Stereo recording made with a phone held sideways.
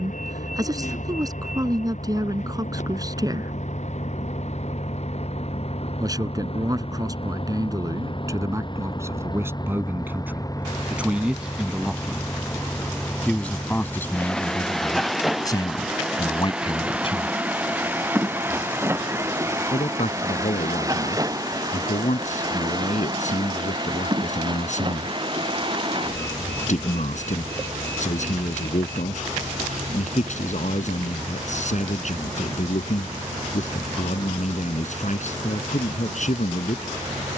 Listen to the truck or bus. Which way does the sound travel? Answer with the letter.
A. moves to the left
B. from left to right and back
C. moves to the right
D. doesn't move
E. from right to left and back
C.